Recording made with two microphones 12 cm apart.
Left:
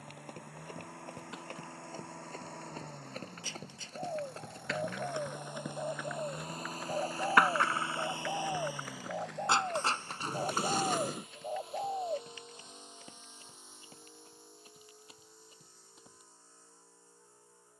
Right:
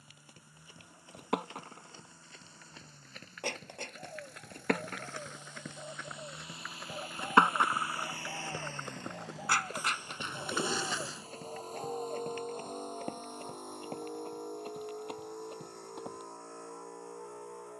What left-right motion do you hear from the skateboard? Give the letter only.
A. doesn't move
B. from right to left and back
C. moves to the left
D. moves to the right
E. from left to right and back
C.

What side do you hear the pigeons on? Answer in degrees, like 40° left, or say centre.
40° left.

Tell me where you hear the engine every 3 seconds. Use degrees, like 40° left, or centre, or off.
70° left, 60° left, 30° left, 20° right, 50° right, 70° right.